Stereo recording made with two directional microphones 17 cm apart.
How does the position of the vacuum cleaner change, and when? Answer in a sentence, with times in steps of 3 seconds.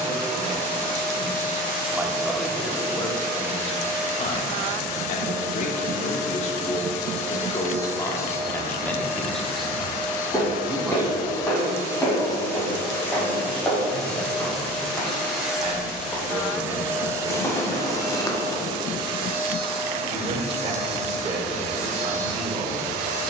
In this clip you hear the vacuum cleaner on the left from 0 s, in the centre from 12 s and on the right from 18 s.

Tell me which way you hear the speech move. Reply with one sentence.
In this clip you hear the speech go left and come back.